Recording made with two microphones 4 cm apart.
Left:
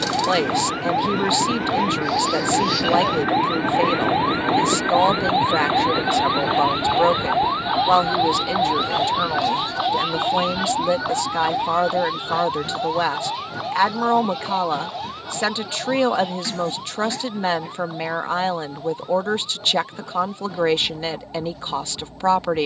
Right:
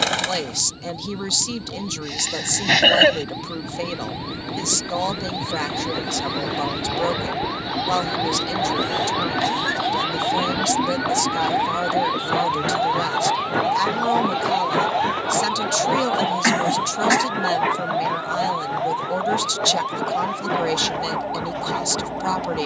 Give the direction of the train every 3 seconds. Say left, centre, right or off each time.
left, left, centre, right, right, right, right, right.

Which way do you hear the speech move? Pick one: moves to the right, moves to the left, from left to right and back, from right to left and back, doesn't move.
doesn't move.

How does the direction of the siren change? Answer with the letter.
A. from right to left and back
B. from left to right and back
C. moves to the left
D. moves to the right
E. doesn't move
D.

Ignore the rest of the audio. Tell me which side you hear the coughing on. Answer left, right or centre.
right.